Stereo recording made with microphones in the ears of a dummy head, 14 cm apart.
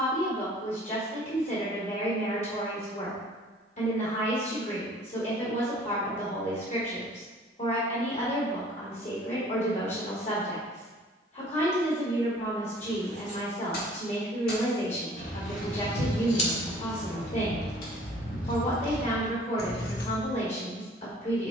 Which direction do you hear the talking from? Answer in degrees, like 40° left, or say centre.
50° left.